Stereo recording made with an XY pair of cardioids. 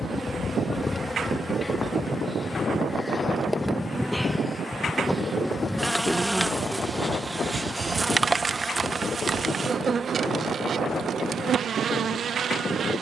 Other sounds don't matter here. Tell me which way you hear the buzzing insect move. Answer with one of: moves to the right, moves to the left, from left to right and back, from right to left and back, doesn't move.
moves to the right.